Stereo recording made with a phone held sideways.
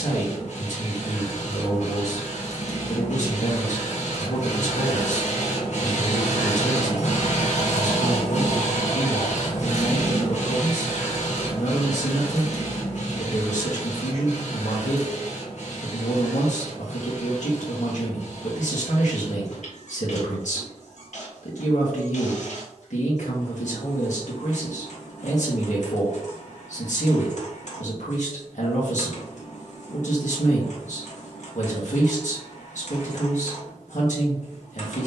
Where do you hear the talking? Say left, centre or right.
left.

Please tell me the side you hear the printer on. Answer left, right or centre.
left.